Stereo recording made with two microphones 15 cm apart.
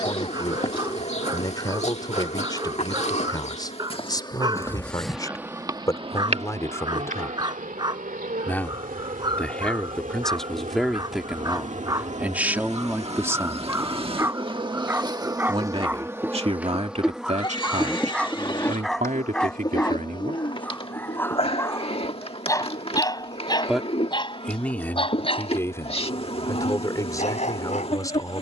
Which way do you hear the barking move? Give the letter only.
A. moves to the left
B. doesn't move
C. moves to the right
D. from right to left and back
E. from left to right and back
A.